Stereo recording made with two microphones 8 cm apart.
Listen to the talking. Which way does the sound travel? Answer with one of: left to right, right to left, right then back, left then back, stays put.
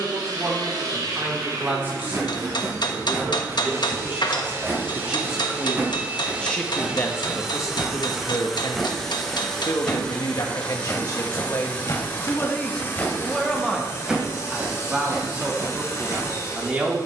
left then back.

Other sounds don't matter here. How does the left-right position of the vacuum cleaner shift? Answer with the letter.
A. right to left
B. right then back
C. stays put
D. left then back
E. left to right
A.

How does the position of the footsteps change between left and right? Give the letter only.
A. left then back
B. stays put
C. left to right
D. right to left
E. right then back
A.